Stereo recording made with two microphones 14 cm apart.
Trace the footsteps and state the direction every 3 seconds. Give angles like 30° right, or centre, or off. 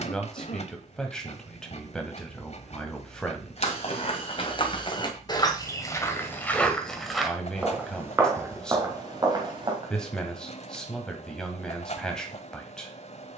off, 40° left, 10° right, 30° right, off.